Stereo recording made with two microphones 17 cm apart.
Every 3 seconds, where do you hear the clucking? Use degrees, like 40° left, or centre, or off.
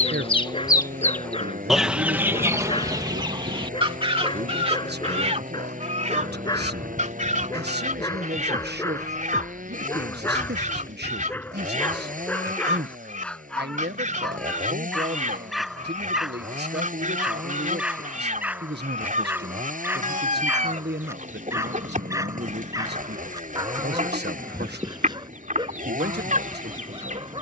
centre, 30° right, 50° right, 50° right, 50° right, 50° right, 50° right, 50° right, 50° right.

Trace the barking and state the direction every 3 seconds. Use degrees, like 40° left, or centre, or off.
30° left, 30° left, 20° left, 10° left, 10° left, centre, 10° right, 20° right, 30° right.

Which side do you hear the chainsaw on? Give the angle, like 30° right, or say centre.
50° right.